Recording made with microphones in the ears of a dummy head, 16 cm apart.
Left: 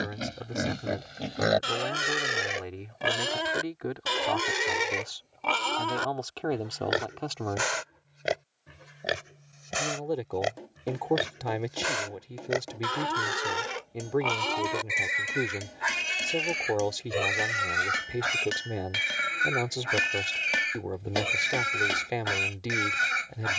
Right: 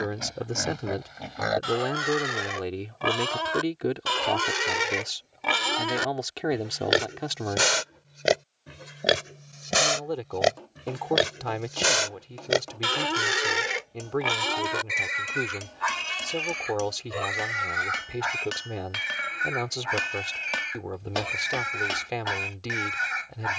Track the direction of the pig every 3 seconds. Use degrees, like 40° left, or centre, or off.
30° left, centre, 40° right, 60° right, 20° right, 20° left, 40° left, 40° left.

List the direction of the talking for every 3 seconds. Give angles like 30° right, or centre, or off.
50° right, 30° right, 10° right, 10° left, 10° left, 10° left, 10° left, 10° left.